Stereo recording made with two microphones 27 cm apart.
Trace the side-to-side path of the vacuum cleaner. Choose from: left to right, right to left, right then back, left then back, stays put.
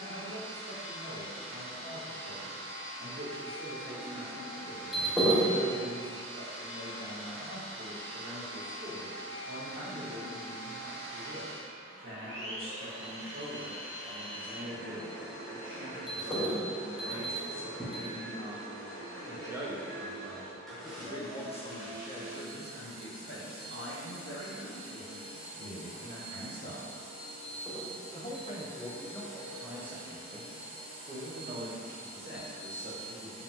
left then back.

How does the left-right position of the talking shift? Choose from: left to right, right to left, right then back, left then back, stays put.
left then back.